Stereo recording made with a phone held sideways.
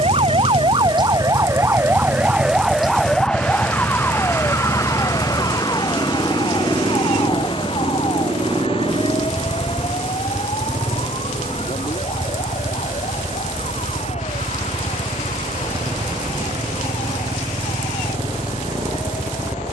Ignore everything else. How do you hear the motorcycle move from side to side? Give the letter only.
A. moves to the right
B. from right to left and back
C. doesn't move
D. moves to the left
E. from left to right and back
C.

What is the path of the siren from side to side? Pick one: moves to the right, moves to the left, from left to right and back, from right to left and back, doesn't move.
moves to the left.